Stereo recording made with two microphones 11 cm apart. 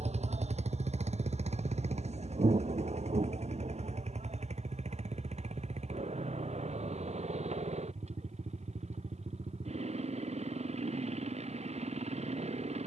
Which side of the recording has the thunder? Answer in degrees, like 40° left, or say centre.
70° right.